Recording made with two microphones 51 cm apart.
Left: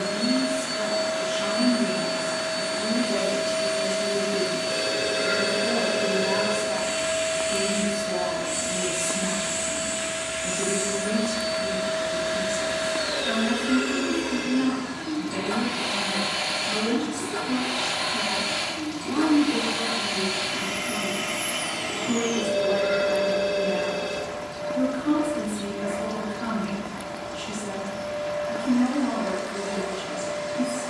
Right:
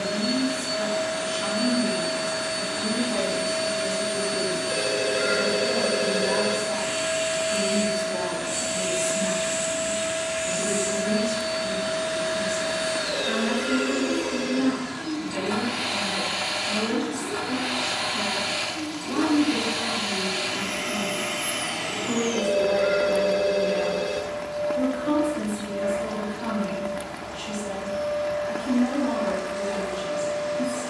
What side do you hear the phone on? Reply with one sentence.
In this clip you hear the phone on the right.